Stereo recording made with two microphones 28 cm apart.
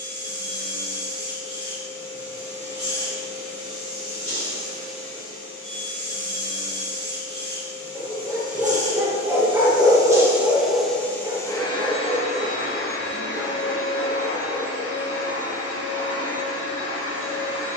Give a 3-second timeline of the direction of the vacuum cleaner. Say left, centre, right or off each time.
right, right, right, centre, left, left.